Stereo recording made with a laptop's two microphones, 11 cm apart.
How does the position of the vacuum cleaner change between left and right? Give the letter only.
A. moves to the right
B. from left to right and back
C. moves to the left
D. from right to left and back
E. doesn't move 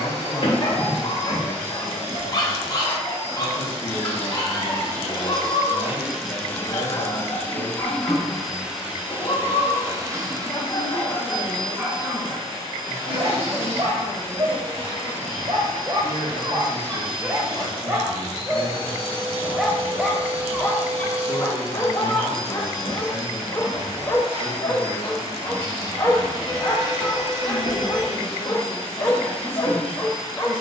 D.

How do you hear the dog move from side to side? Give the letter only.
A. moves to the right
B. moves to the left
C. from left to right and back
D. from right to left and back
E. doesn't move
C.